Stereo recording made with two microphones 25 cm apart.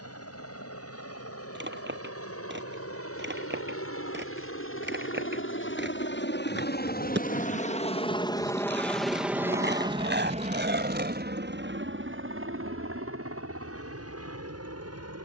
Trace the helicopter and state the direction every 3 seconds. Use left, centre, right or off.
left, left, left, right, right.